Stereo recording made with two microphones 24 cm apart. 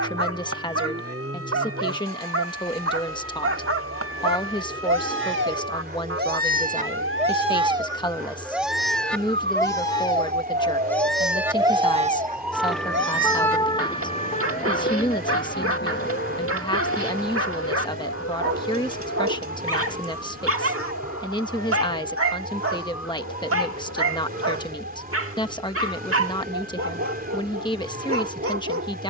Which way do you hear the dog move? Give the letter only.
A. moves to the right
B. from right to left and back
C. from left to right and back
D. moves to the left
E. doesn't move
B.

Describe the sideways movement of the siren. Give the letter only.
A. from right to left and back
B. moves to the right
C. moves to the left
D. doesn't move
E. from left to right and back
C.